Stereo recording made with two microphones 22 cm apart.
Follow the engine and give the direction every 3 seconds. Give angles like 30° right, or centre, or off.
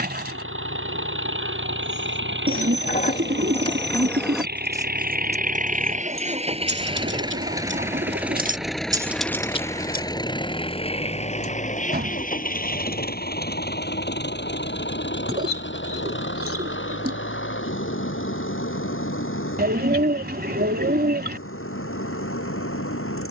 60° right, 50° right, 20° right, 20° left, 50° left, 60° left, 70° left, 70° left.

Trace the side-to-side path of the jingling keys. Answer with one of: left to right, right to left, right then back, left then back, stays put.
right then back.